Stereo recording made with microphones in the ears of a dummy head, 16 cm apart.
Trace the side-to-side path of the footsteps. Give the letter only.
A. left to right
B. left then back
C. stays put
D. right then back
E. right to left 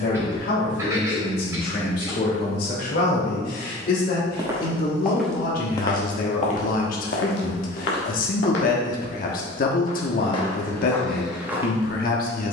B.